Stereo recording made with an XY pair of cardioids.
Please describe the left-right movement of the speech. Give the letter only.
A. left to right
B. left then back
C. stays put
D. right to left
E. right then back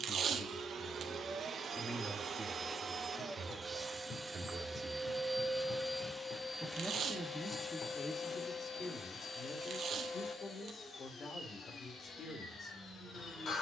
E.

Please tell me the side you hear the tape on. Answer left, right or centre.
right.